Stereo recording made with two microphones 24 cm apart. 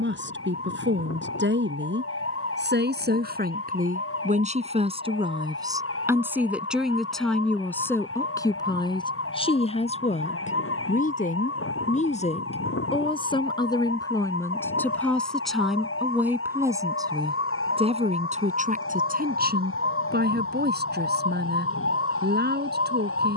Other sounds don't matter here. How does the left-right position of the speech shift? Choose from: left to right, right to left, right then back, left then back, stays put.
left then back.